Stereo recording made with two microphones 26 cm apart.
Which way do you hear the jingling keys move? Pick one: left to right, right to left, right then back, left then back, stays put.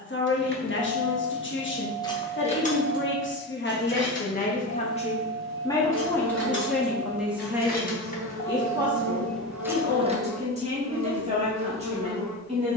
left then back.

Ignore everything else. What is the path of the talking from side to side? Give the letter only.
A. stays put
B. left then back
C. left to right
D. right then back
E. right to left
C.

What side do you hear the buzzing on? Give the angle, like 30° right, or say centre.
80° right.